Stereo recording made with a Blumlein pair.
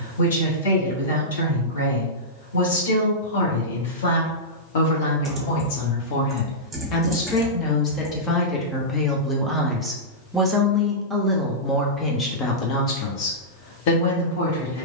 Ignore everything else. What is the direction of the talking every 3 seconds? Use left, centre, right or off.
left, left, left, centre, left.